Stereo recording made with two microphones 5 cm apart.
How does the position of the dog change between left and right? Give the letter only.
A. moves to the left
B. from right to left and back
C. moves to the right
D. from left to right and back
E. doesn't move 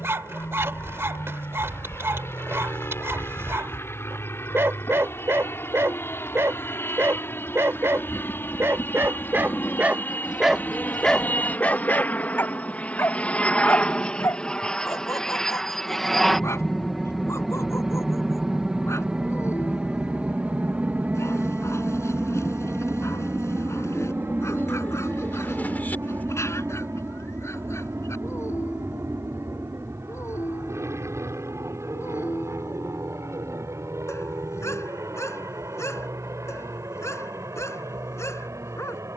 A.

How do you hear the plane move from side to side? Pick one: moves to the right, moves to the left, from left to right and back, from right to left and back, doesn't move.
moves to the right.